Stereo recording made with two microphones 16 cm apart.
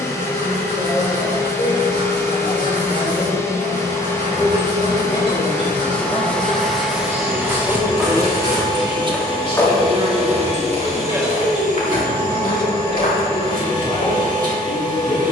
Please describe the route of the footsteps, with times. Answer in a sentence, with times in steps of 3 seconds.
In this clip you hear the footsteps not at all from 0 s, in the centre from 6 s and on the left from 9 s.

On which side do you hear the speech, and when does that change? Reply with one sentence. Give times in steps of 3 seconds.
You can hear the speech on the left from 0 s, in the centre from 6 s, on the right from 9 s and on the left from 12 s.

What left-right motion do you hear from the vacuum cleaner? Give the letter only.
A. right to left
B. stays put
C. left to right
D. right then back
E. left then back
C.